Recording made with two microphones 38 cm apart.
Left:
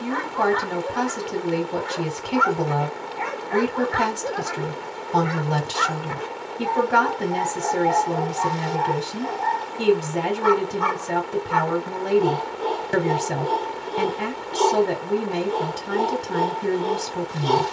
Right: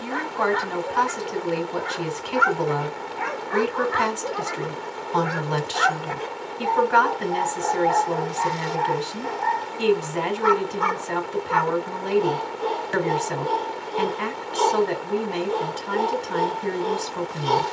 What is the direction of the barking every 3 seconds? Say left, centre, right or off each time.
right, centre, left, left, left, left.